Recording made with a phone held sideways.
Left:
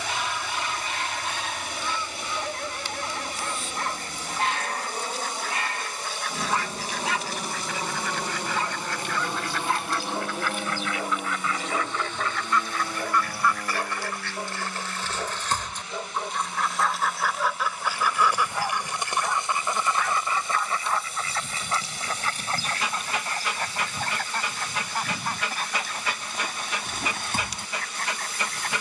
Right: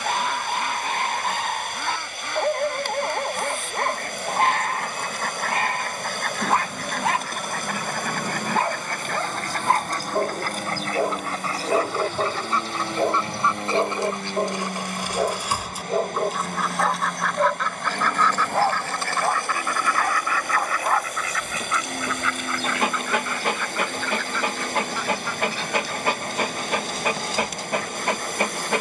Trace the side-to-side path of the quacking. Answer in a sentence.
You can hear the quacking travel towards the left.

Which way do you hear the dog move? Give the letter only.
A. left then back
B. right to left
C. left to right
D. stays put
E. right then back
D.